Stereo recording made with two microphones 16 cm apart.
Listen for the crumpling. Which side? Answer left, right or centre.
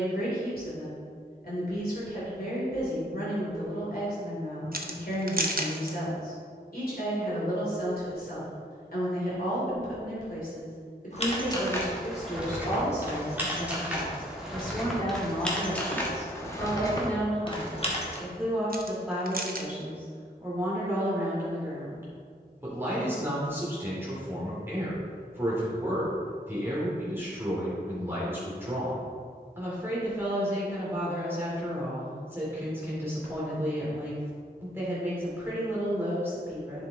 right.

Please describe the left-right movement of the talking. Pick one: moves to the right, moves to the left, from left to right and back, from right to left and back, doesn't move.
moves to the right.